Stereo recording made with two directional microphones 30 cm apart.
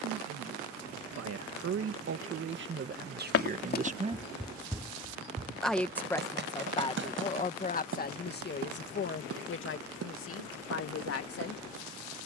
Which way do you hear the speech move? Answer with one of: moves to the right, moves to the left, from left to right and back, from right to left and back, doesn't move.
moves to the left.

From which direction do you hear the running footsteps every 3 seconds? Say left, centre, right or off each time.
off, centre, right, right.